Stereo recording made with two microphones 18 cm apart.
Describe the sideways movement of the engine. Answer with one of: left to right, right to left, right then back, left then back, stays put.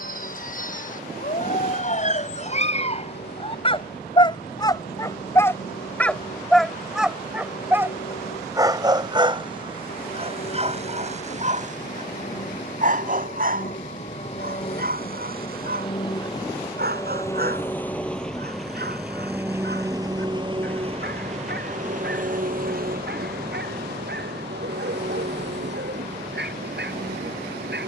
left to right.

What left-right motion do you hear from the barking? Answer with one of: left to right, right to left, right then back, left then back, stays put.
left to right.